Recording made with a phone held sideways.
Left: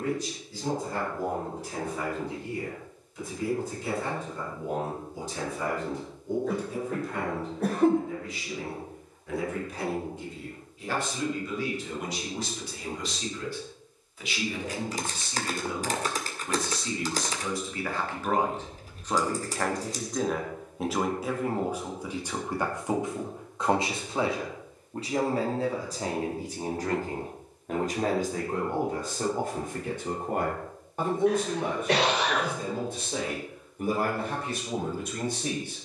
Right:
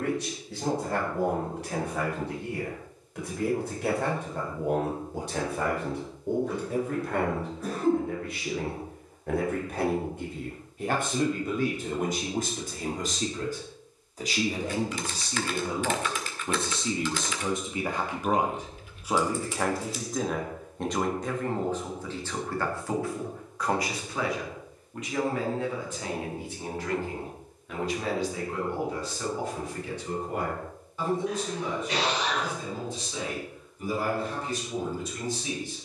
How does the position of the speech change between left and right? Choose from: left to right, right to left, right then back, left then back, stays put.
right to left.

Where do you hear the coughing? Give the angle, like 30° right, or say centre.
70° left.